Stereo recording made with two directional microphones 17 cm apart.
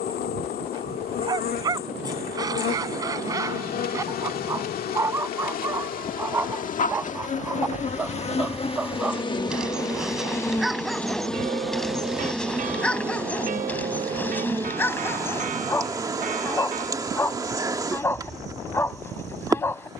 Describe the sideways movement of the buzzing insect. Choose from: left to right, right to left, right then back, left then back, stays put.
left to right.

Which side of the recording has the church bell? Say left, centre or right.
right.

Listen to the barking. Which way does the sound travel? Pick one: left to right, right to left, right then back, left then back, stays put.
right to left.